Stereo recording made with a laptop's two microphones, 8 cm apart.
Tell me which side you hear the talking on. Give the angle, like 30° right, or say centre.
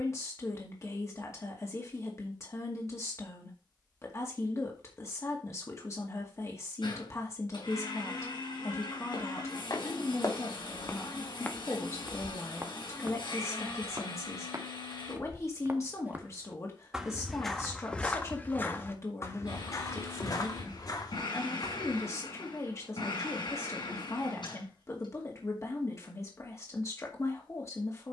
40° left.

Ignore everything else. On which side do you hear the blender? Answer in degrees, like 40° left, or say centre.
70° left.